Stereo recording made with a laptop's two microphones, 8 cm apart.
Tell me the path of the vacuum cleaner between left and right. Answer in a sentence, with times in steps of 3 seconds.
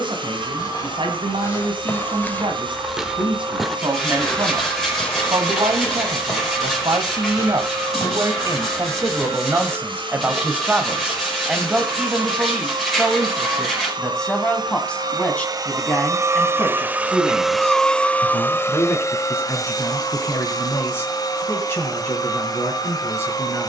In this clip you hear the vacuum cleaner on the right from 0 s and on the left from 18 s.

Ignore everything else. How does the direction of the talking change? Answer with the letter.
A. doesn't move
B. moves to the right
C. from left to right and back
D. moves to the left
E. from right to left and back
D.